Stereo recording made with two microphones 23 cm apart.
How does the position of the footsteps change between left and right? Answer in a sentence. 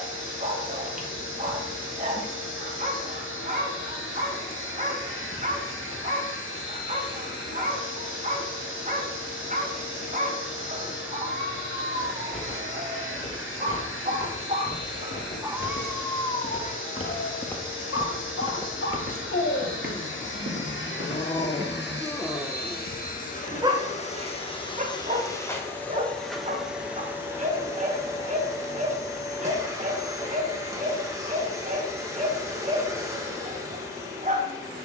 In this clip you hear the footsteps travel towards the right.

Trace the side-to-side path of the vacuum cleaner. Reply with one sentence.
In this clip you hear the vacuum cleaner go from the left side to the right.